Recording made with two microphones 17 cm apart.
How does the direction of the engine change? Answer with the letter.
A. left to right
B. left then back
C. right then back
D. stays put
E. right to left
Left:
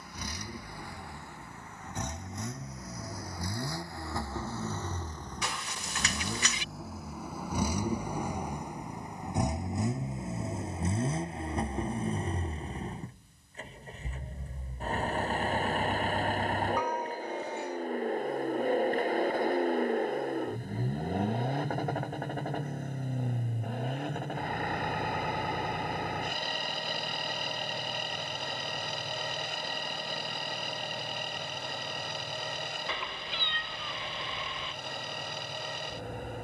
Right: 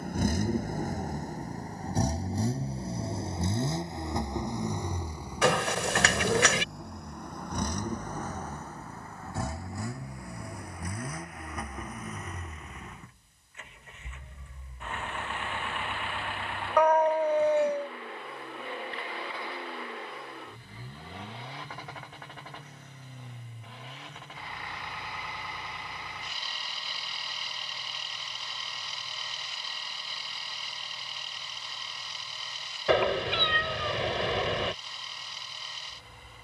E.